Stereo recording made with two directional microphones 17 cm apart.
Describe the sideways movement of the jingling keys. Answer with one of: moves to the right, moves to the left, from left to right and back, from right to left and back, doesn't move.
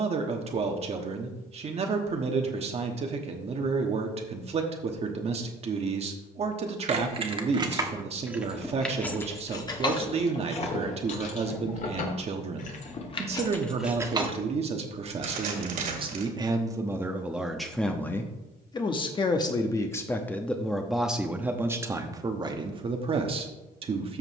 from right to left and back.